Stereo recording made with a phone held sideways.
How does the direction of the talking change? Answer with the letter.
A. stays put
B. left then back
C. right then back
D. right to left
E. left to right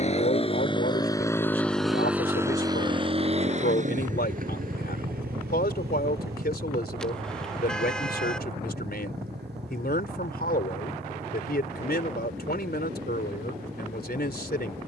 A.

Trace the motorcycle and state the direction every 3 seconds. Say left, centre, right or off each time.
centre, right, right, right, right.